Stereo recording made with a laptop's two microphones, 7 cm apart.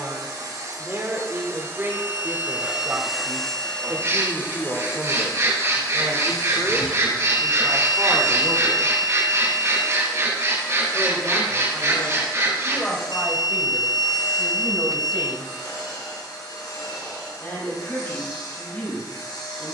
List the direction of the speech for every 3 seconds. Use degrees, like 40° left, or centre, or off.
30° right, 30° right, 20° right, 10° left, 20° left, 20° left, 30° left.